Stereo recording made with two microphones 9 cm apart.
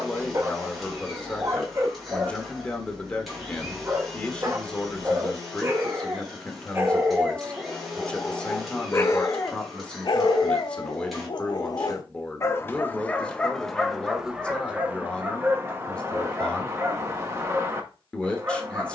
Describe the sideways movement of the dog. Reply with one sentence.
In this clip you hear the dog go left and come back.